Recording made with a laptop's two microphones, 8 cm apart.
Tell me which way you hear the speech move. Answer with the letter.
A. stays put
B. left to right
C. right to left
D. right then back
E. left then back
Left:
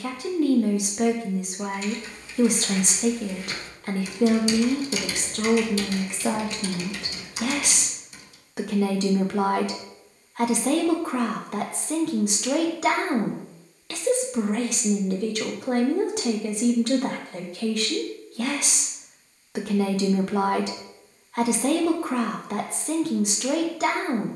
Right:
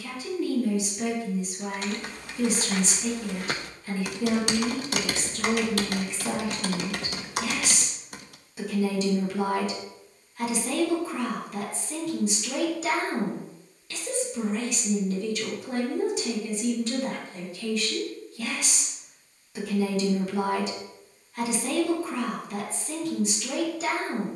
A.